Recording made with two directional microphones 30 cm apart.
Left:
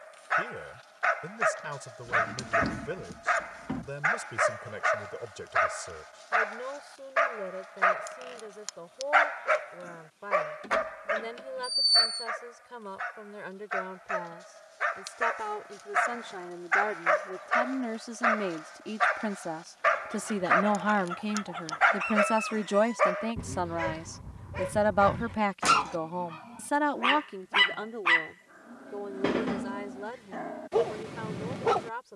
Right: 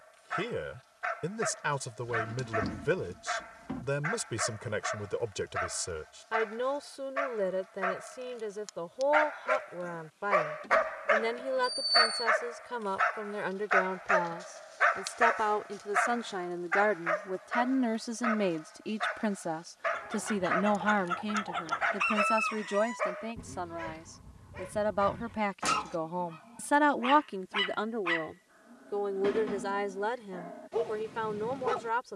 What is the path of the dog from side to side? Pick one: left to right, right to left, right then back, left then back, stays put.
right then back.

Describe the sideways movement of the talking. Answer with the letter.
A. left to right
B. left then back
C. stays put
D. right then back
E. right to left
B.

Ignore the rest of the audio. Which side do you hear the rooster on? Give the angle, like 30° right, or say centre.
30° right.